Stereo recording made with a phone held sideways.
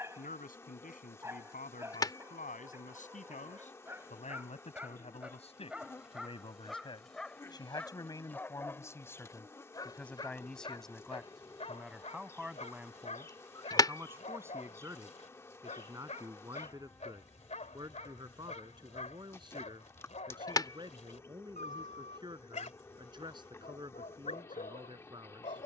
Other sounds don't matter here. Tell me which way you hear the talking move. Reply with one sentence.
In this clip you hear the talking move to the right.